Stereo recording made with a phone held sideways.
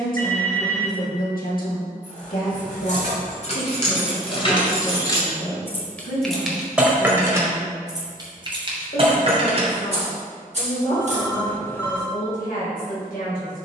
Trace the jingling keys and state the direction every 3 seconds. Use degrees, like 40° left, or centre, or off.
60° left, 40° left, 20° right, 50° right, off.